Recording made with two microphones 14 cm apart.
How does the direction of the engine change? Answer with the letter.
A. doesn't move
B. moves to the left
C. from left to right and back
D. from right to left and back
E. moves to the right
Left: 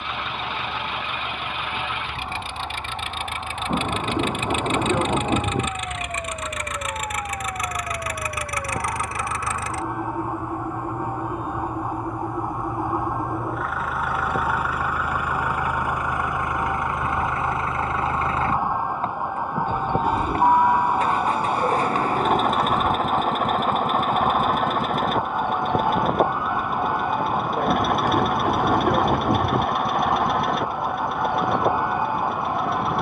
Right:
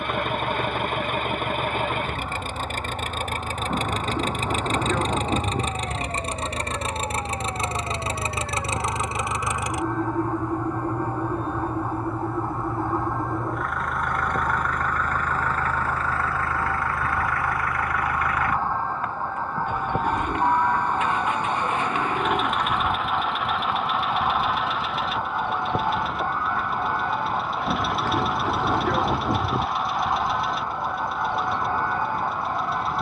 B.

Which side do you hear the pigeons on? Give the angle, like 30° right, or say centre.
10° left.